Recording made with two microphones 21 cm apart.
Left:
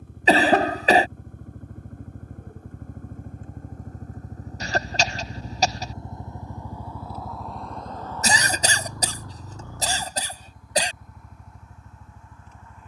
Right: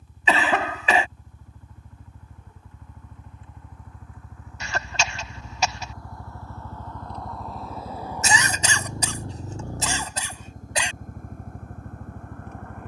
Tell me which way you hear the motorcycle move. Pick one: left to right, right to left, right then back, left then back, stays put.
left to right.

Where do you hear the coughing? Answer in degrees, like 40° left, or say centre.
40° left.